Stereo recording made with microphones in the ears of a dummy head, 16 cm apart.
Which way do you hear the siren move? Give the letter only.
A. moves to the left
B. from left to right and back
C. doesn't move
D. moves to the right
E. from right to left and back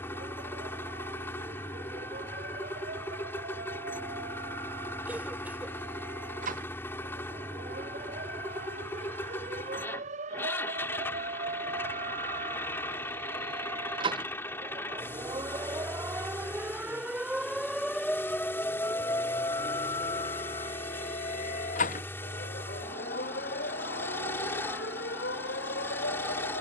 A.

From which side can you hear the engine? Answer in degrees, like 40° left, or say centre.
10° left.